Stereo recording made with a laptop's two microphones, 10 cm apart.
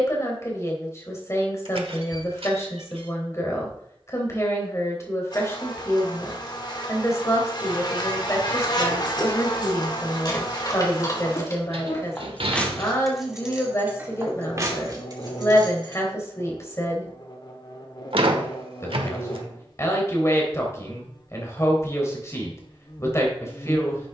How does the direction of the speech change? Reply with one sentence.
In this clip you hear the speech stay put.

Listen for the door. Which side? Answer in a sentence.
In this clip you hear the door on the right.